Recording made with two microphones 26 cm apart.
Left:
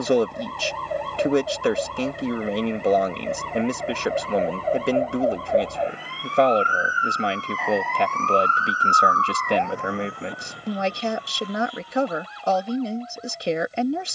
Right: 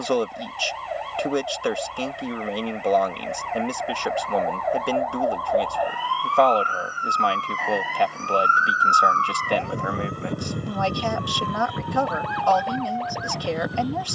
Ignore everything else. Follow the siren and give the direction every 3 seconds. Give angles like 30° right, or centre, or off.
50° left, 30° left, centre, 50° right, 70° right.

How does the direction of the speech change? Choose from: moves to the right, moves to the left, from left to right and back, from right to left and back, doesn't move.
doesn't move.